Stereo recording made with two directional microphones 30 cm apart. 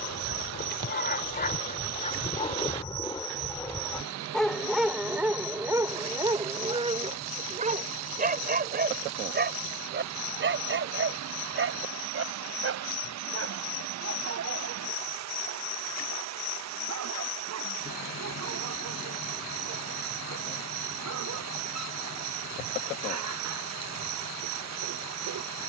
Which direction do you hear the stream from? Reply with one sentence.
In this clip you hear the stream on the right.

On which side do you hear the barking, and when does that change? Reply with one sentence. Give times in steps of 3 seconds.
In this clip you hear the barking on the left from 0 s, in the centre from 3 s and on the right from 6 s.